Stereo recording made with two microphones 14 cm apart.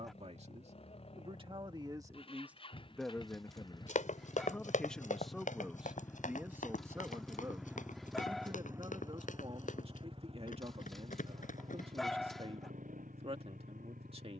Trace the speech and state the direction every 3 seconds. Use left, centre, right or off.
right, centre, right, right, right.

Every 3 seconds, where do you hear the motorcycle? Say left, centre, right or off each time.
left, left, centre, right, right.